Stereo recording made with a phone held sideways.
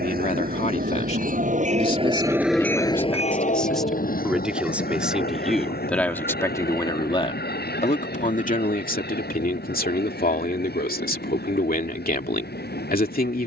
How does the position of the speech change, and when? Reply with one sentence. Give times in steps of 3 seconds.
In this clip you hear the speech on the left from 0 s, in the centre from 3 s and on the left from 6 s.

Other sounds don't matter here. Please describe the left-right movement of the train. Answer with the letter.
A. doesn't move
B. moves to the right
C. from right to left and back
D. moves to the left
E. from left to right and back
D.